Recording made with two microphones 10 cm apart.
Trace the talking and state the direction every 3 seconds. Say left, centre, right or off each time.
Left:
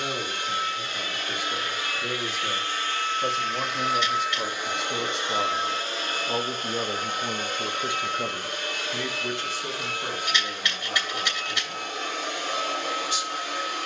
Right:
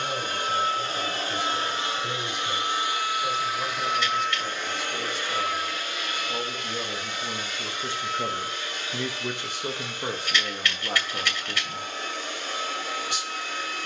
left, left, left, right, right.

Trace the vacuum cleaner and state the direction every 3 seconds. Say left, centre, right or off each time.
right, centre, left, left, left.